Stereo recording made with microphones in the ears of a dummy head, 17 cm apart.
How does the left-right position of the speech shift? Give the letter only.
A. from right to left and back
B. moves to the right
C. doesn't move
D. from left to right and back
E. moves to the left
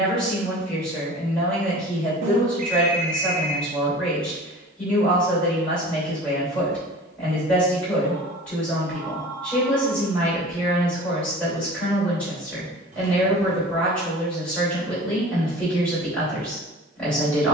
C.